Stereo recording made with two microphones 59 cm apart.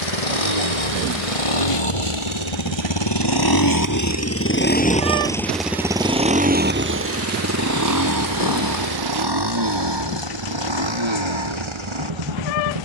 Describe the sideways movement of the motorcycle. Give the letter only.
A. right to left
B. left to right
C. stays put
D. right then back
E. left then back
B.